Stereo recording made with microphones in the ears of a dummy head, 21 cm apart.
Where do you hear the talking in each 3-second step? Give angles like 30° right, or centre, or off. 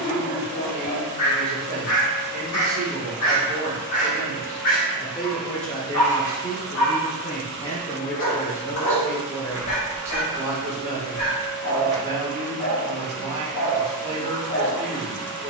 40° right, 10° right, 20° left, 20° right, 30° right.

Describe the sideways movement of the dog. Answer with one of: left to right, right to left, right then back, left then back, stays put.
stays put.